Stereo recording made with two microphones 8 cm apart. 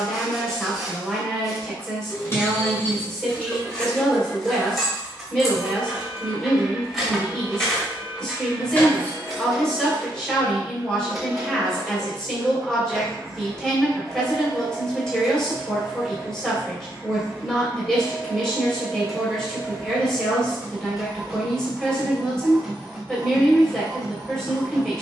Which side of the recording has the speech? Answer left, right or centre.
centre.